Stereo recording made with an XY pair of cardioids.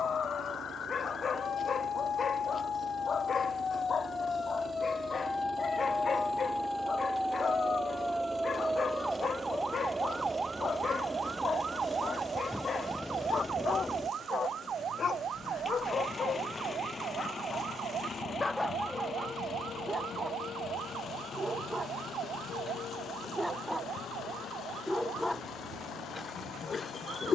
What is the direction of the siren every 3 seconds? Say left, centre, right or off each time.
left, left, centre, right, right, right, right, right, right.